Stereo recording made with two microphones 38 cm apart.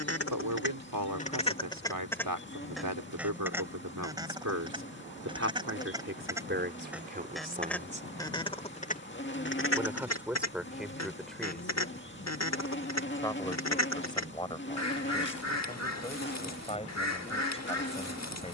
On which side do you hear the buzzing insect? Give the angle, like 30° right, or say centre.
30° left.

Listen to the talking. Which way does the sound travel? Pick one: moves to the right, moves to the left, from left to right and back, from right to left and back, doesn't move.
moves to the left.